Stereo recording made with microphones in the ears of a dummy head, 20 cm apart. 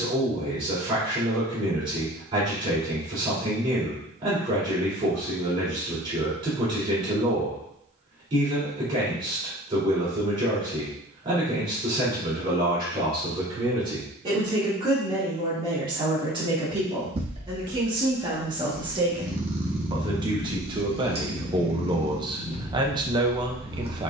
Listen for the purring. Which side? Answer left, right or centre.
right.